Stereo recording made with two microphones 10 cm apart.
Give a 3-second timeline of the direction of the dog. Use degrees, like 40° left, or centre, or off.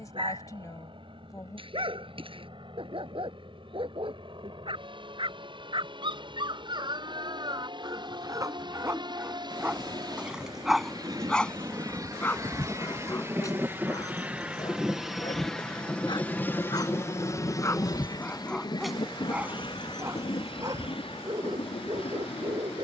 70° right, 60° right, 50° right, centre, 30° left, 40° left, 20° right, 60° right.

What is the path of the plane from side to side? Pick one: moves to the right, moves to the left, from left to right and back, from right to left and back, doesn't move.
moves to the left.